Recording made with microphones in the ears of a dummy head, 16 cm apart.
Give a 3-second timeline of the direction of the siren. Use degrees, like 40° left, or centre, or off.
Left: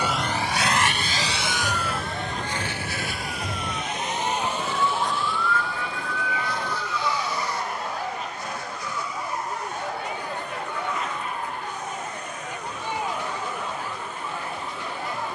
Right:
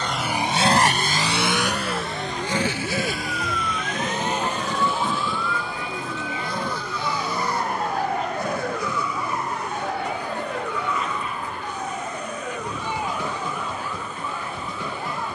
50° left, 10° left, 40° right, 50° right, 60° right.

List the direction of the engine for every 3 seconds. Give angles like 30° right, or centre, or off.
40° right, 70° right, 70° right, 70° right, 70° right.